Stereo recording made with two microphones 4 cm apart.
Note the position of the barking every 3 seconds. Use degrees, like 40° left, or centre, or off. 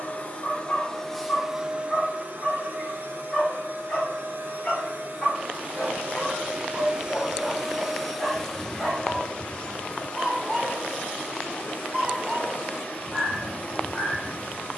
30° left, 20° left, 10° left, centre, 10° right.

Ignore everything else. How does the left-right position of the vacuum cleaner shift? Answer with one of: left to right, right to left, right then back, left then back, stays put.
right then back.